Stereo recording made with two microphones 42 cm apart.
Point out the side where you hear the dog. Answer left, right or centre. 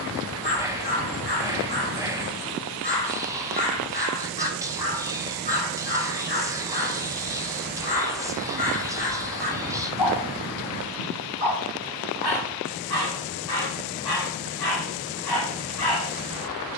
left.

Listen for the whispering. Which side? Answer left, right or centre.
centre.